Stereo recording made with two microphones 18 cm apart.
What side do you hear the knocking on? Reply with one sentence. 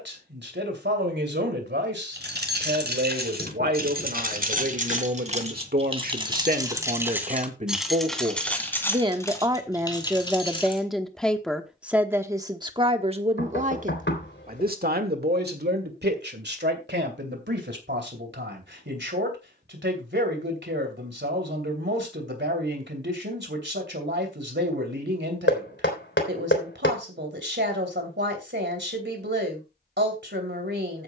In this clip you hear the knocking on the left.